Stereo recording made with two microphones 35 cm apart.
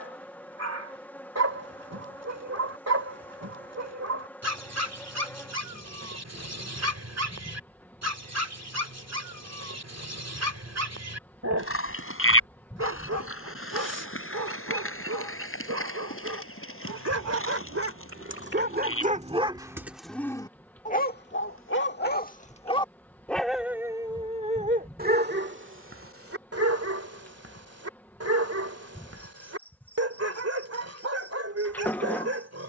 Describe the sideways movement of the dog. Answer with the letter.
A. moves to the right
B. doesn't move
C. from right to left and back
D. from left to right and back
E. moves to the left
C.